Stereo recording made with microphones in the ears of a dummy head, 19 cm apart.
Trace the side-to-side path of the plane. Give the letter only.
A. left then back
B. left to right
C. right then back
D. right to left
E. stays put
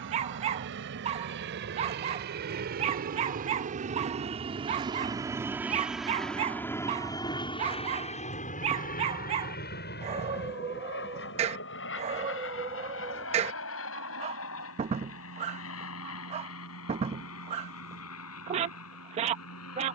D.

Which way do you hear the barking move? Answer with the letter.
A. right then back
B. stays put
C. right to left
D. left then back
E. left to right
B.